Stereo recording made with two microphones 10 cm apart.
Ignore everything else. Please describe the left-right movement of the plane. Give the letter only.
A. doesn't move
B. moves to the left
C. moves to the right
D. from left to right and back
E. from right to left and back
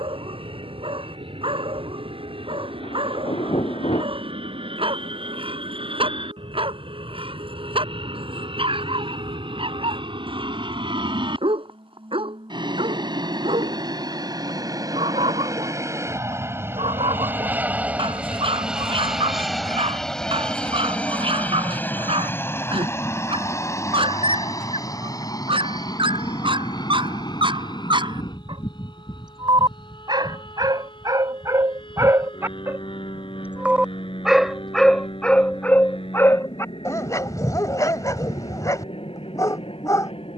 B.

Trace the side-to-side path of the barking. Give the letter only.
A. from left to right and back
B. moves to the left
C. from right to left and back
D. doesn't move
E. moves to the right
B.